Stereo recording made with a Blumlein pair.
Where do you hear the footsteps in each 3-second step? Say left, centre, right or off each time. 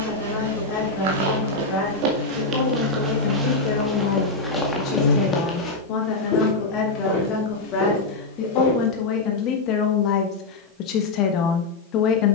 right, centre, left, off.